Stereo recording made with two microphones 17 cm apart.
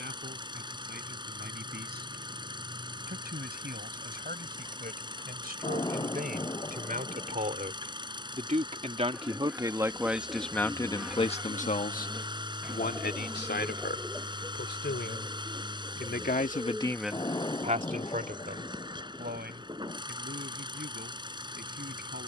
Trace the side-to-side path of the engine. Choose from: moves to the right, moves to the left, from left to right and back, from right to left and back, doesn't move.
doesn't move.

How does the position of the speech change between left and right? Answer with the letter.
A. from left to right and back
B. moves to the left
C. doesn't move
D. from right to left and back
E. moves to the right
D.